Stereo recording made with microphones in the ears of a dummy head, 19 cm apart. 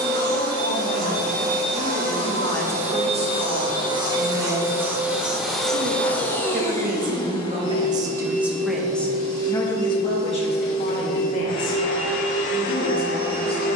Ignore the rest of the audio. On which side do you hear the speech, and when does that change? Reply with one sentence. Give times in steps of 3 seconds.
You can hear the speech on the left from 0 s, on the right from 3 s and on the left from 9 s.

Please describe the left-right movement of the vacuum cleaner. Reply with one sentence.
In this clip you hear the vacuum cleaner move from right to left.